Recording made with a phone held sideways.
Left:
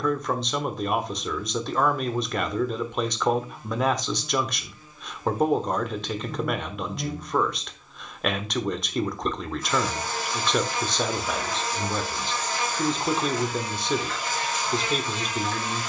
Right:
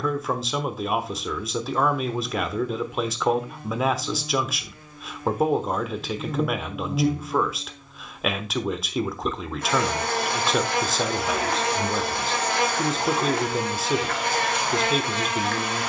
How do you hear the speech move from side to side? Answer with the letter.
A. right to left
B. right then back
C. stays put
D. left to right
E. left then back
C.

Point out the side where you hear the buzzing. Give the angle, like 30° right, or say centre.
70° right.